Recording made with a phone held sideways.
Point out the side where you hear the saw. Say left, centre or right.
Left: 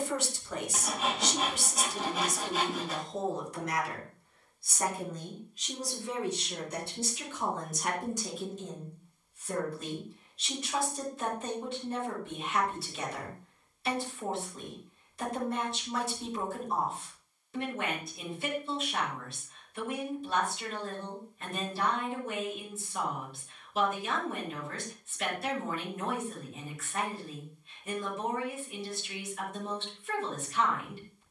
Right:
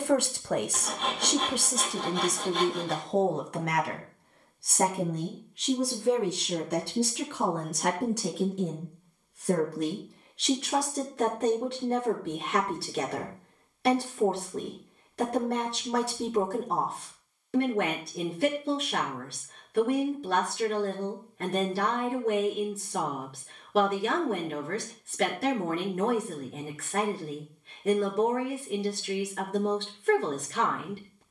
centre.